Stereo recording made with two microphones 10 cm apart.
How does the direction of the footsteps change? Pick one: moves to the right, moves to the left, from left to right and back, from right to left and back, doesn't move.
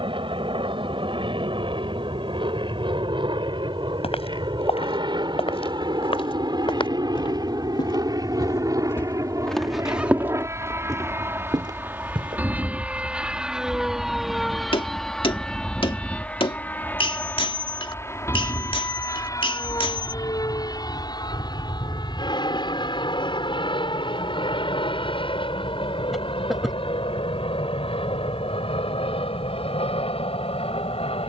moves to the right.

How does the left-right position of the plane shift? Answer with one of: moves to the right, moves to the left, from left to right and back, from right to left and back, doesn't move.
moves to the left.